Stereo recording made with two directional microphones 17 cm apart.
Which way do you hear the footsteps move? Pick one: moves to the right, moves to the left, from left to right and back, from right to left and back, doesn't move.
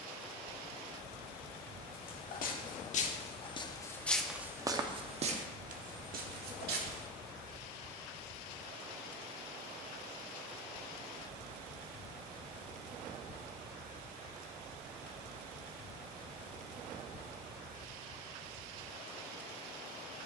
moves to the right.